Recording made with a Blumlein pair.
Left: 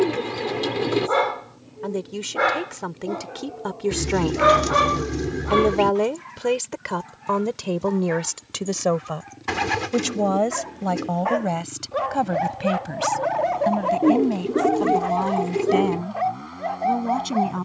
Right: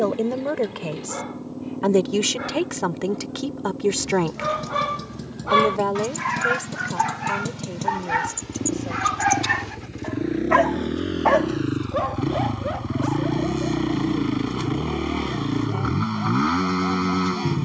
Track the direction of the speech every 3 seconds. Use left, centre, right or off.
right, centre, left, left, left, left.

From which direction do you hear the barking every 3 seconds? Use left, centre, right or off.
left, left, right, right, left, left.